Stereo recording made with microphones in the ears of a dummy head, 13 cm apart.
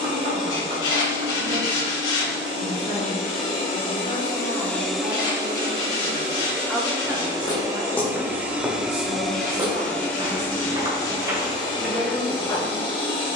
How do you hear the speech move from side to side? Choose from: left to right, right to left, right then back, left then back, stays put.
left to right.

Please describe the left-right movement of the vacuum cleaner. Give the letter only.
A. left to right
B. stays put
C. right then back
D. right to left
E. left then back
C.